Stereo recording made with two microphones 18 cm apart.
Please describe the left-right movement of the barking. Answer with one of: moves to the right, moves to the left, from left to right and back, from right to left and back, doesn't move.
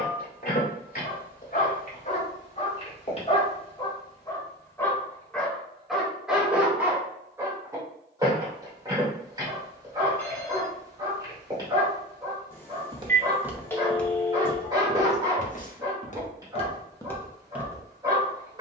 moves to the right.